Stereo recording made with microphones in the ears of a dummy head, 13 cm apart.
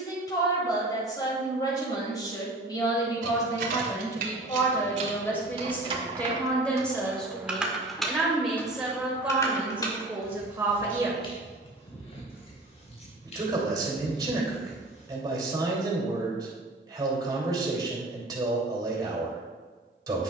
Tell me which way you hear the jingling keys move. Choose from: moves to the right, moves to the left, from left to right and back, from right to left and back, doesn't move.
moves to the left.